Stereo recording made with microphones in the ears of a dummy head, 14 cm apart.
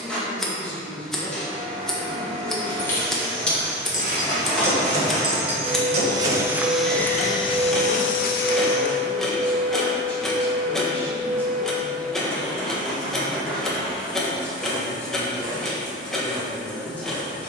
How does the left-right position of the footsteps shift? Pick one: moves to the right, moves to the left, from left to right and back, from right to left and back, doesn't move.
moves to the left.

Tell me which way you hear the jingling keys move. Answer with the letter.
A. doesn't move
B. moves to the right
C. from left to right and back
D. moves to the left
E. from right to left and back
B.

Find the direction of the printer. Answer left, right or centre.
centre.